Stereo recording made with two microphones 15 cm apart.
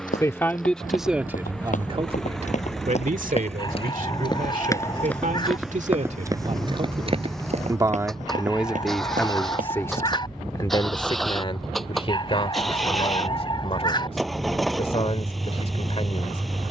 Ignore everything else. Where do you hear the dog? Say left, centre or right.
left.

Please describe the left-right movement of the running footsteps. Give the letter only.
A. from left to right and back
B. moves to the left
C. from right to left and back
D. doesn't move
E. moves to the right
E.